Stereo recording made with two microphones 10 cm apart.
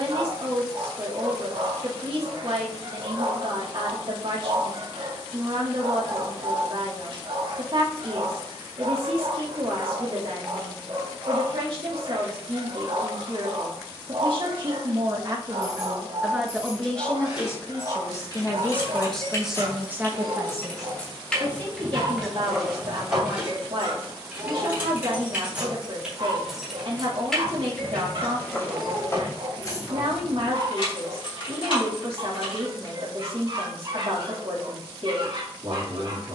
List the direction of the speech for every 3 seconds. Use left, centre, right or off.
right, right, right, right, right, centre, centre, right, right, right, right, right.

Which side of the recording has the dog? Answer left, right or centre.
right.